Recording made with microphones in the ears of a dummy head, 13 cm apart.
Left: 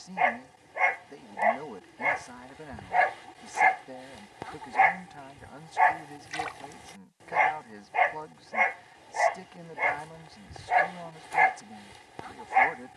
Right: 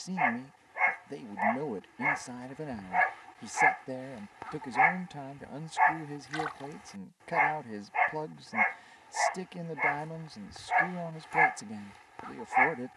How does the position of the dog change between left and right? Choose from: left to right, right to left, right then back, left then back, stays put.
stays put.